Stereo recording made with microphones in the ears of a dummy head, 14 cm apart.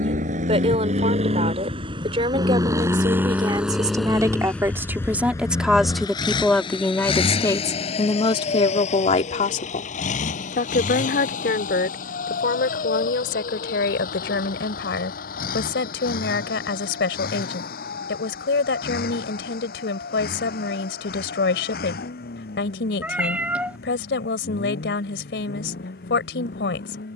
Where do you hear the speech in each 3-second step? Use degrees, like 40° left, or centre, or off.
40° right, 20° right, 20° left, 60° left, 70° left, 80° left, 80° left, 80° left, 80° left.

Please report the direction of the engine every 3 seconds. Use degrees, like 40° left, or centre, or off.
40° right, 10° left, 40° left, 50° left, 60° left, 60° left, 70° left, 70° left, 70° left.